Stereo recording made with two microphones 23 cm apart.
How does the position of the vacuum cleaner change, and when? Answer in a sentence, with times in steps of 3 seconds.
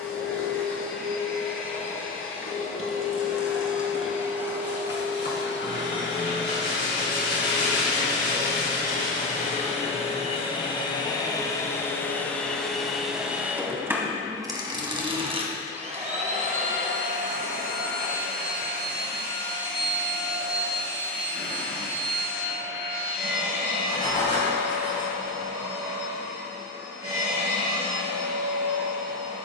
You can hear the vacuum cleaner on the left from 0 s, in the centre from 12 s and on the right from 15 s.